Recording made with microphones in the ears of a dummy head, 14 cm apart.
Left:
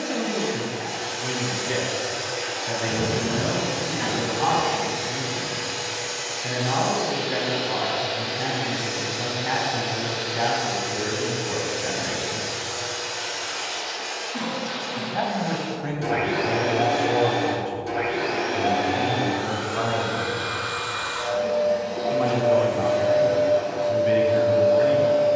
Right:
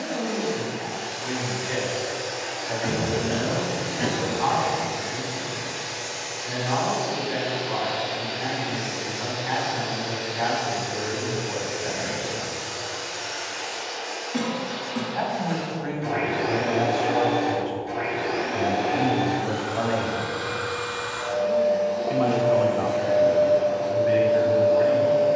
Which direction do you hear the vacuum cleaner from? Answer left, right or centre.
left.